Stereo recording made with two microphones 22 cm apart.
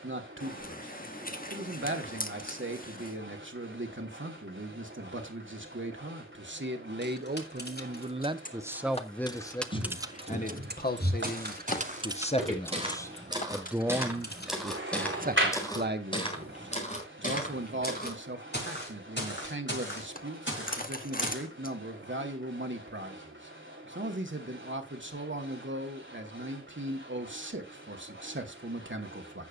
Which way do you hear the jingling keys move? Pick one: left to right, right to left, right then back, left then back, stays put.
right then back.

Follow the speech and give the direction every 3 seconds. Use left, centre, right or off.
right, right, right, left, centre, right, right, right, right, right.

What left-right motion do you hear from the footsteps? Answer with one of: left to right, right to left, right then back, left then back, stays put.
right to left.